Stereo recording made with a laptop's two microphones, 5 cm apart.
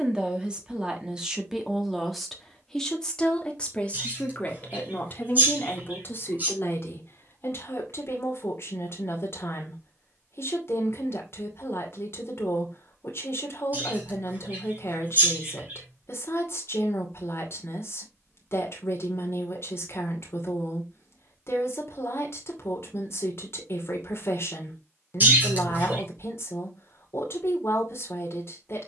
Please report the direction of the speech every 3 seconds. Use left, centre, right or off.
centre, left, left, left, left, left, left, left, left, left.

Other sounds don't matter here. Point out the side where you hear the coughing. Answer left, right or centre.
right.